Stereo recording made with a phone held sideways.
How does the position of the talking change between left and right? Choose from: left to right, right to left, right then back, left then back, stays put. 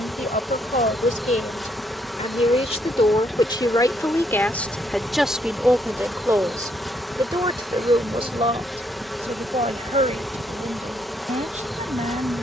left to right.